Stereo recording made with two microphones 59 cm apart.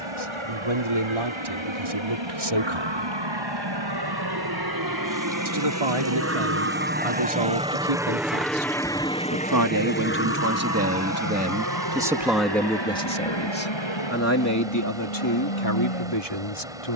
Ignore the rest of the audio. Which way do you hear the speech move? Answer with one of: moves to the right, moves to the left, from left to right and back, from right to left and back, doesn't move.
moves to the left.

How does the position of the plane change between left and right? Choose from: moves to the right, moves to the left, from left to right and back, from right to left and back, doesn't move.
moves to the left.